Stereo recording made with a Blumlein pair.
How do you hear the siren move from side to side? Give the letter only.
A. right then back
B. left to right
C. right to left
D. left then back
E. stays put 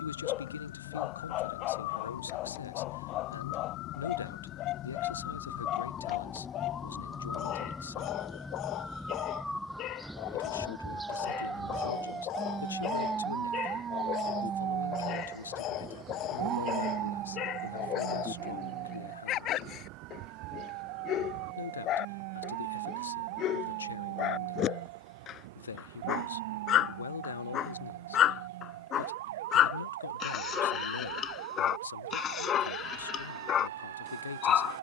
B.